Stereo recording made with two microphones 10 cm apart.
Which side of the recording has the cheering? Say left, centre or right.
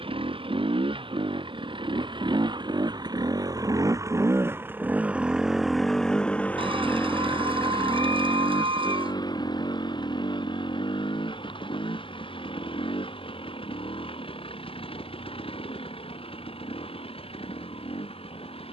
right.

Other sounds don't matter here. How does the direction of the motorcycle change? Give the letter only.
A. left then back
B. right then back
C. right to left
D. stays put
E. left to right
C.